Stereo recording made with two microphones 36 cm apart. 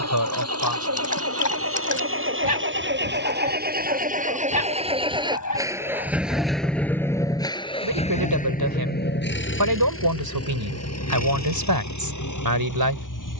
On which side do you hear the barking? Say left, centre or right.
left.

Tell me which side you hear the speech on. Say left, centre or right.
right.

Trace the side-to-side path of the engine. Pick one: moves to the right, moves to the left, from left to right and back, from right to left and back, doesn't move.
moves to the left.